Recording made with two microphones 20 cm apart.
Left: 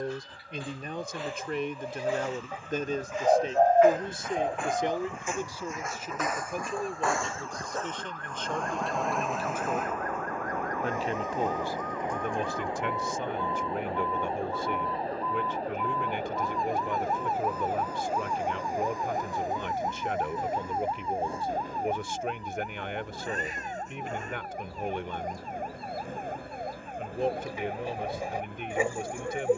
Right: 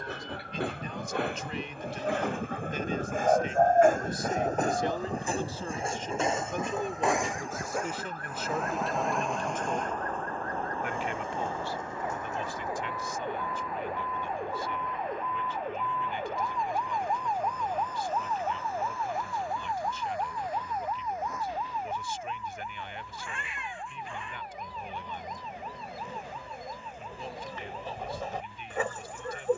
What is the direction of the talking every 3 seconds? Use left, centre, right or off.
left, left, centre, left, left, left, left, left, left, left.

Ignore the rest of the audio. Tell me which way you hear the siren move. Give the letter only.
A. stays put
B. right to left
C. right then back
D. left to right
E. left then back
B.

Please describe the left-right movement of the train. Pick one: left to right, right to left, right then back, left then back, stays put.
right to left.